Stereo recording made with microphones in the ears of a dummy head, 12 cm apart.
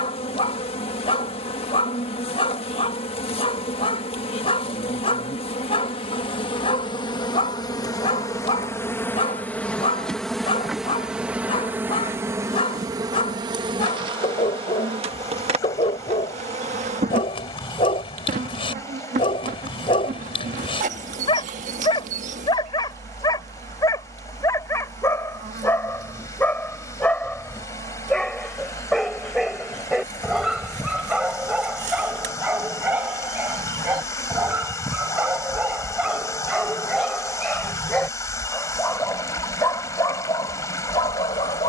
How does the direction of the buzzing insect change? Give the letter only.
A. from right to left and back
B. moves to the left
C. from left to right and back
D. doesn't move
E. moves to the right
E.